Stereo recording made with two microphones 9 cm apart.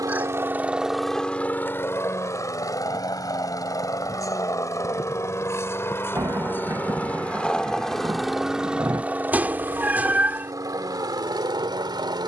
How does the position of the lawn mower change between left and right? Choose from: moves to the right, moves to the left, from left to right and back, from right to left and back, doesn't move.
from right to left and back.